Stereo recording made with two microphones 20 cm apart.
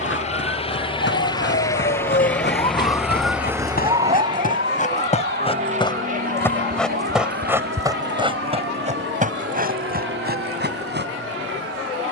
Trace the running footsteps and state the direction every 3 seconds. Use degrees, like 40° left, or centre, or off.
60° left, 40° left, 10° right, 50° right.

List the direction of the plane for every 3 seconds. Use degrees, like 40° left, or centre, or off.
20° left, 20° right, 50° right, 60° right.